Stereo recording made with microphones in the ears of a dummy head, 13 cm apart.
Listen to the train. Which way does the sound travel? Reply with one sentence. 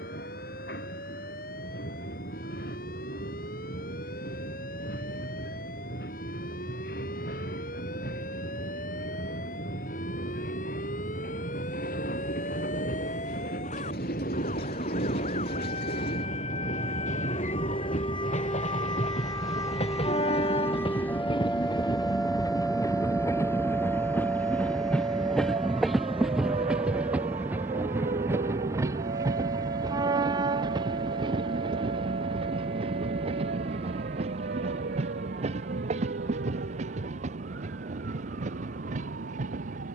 You can hear the train move to the right.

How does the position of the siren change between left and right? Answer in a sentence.
You can hear the siren go from the left side to the right.